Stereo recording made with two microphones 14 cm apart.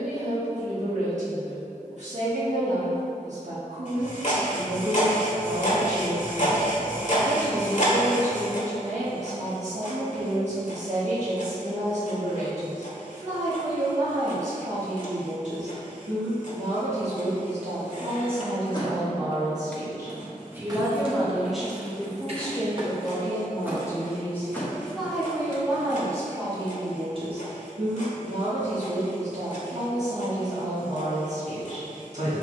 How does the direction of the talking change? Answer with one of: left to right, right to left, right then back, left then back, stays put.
left then back.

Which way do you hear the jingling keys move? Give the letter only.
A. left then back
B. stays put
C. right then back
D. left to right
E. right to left
C.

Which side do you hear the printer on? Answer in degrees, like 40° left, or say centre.
60° left.